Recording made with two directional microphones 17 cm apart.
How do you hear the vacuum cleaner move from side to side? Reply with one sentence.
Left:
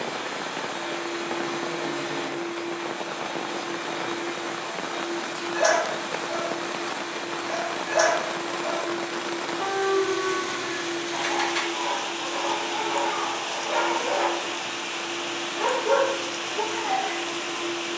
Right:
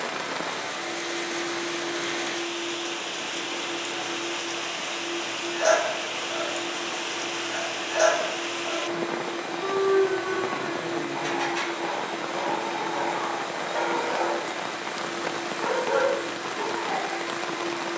In this clip you hear the vacuum cleaner stay in one place.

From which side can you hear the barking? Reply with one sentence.
In this clip you hear the barking on the left.